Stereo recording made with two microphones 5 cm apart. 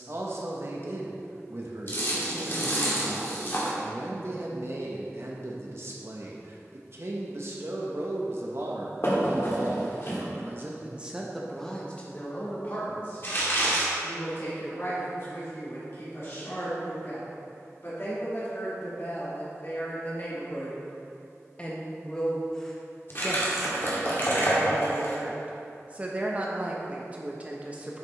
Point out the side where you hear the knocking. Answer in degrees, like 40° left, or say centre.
50° left.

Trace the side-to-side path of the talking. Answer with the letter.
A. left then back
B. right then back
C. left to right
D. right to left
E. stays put
A.